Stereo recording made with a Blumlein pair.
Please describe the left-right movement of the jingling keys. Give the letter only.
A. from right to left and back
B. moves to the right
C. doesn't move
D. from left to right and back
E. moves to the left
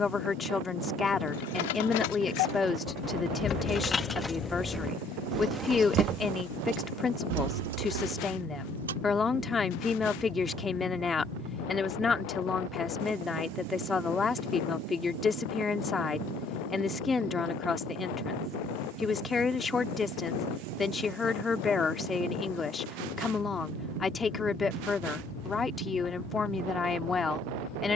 B.